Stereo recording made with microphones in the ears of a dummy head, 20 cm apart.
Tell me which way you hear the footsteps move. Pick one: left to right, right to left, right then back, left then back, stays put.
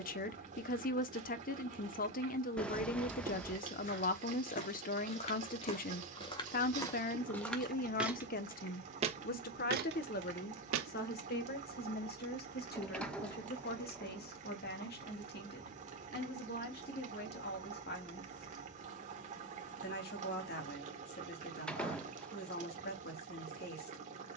left to right.